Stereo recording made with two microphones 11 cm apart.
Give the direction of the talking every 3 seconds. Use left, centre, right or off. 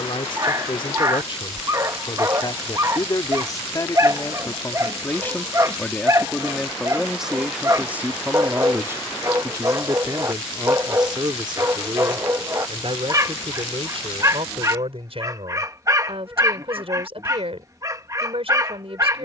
left, left, centre, right, right, right, right.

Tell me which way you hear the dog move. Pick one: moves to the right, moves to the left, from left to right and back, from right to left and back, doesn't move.
doesn't move.